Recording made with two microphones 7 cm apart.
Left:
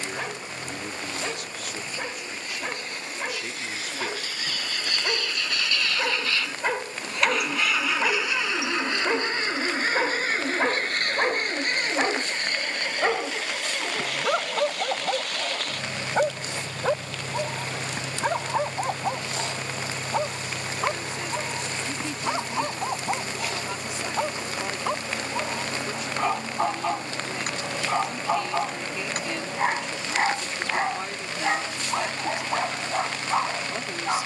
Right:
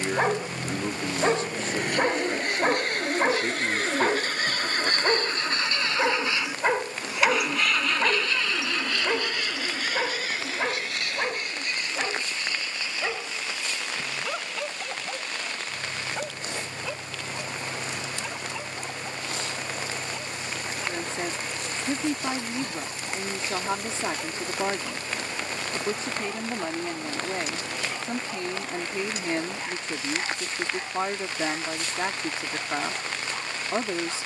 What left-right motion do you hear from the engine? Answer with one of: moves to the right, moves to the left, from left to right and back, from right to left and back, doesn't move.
moves to the left.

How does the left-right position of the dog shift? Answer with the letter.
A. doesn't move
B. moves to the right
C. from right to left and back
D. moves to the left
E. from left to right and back
D.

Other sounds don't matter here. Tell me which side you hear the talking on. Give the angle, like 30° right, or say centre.
30° right.